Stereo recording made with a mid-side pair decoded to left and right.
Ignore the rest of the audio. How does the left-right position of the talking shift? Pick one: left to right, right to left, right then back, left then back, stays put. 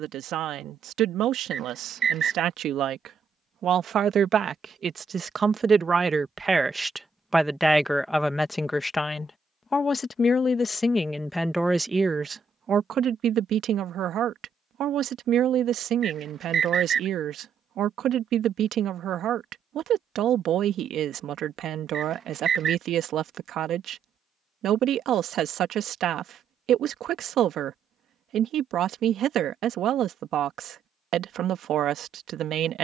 left then back.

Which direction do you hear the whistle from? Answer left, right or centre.
right.